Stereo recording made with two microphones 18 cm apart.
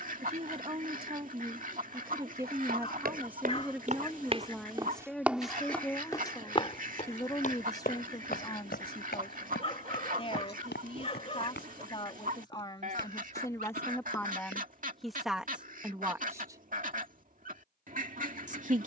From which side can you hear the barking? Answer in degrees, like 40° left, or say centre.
30° left.